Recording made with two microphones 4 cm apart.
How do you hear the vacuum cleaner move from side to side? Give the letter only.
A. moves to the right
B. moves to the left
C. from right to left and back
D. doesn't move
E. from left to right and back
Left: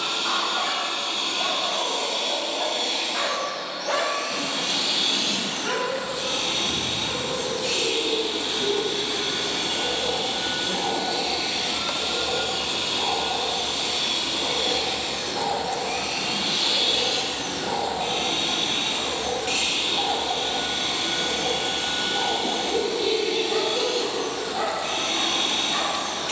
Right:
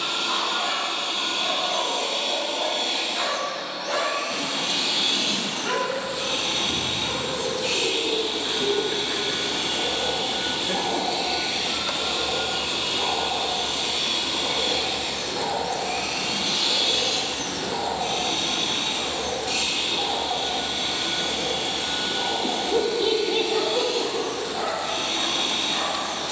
B.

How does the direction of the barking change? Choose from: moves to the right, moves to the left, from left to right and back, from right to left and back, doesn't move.
from left to right and back.